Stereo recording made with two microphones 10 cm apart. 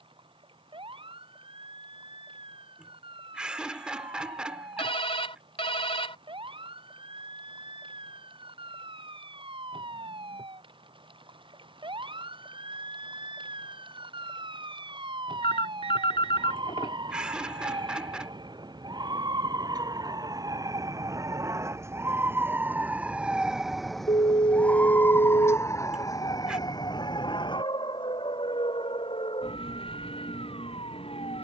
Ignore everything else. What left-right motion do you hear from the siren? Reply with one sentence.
You can hear the siren go from the right side to the left.